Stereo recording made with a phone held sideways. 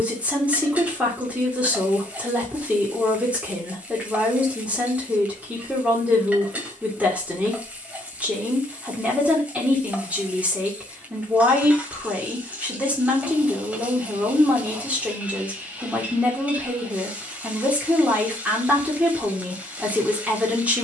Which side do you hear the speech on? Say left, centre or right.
centre.